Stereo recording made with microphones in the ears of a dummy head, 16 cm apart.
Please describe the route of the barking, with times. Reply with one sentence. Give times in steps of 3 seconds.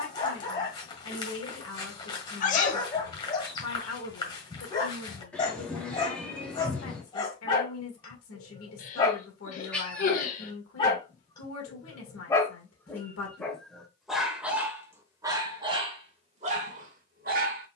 In this clip you hear the barking on the left from 0 s, in the centre from 12 s and on the right from 15 s.